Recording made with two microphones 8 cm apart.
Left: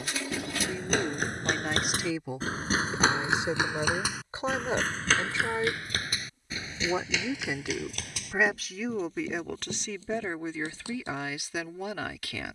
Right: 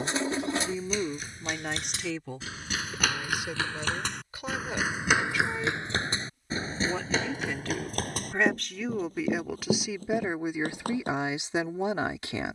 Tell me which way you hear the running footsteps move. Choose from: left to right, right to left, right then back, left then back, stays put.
left to right.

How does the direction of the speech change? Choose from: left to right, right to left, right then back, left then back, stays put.
left then back.